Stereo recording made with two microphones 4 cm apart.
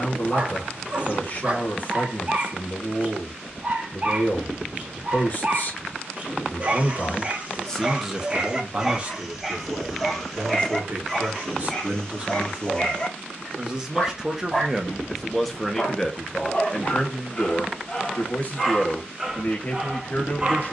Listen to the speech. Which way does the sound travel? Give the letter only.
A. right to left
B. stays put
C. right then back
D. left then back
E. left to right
C.